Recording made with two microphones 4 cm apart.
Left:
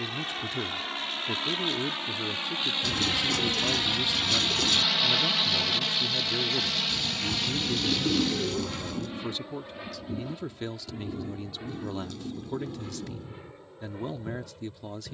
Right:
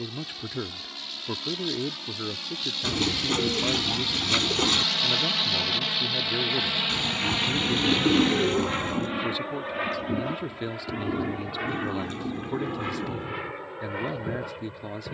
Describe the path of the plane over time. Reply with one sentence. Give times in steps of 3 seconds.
You can hear the plane on the left from 0 s, in the centre from 3 s and on the right from 6 s.